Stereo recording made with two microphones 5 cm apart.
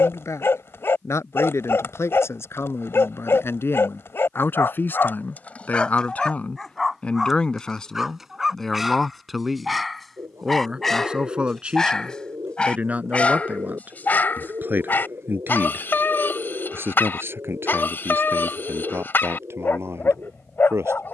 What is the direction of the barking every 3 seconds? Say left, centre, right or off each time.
left, left, centre, centre, left, left, left.